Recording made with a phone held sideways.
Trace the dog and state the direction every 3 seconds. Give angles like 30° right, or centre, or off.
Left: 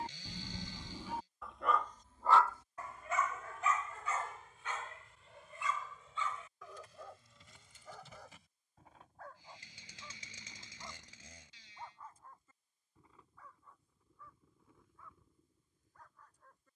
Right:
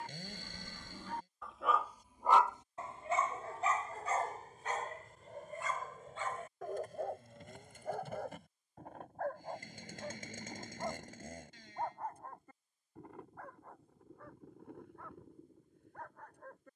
centre, 40° right, 60° right, 60° right, 60° right, 70° right.